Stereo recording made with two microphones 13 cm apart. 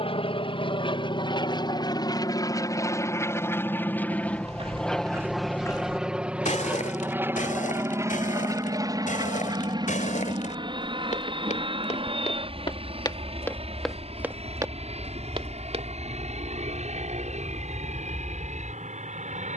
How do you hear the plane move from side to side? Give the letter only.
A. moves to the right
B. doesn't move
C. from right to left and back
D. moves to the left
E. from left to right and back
A.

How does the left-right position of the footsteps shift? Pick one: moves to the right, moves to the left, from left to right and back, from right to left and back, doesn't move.
from right to left and back.